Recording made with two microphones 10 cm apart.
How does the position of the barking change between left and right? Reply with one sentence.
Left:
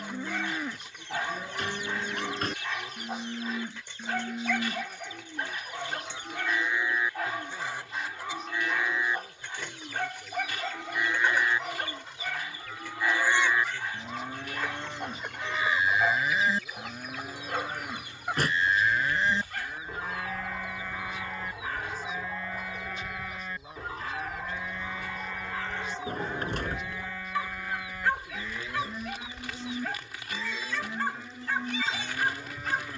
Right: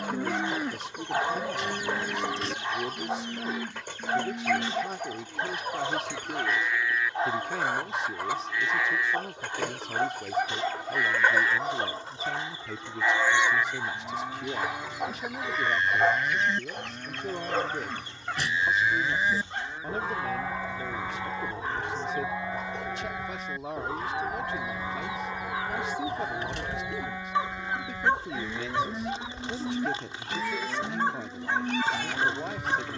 You can hear the barking stay put.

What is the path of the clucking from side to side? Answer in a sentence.
You can hear the clucking move from right to left and back again.